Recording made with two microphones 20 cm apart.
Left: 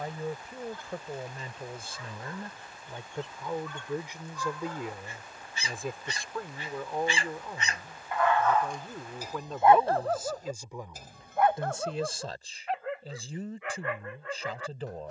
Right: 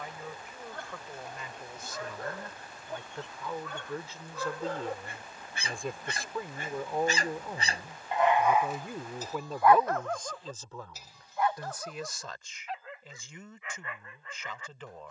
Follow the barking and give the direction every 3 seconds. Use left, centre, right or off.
right, right, right, left, left.